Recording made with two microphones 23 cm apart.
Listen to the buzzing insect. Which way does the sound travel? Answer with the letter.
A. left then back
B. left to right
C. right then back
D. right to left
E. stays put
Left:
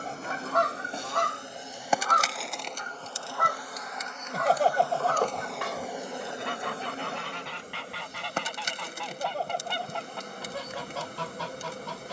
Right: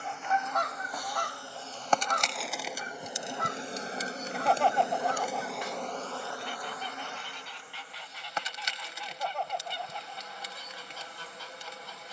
C.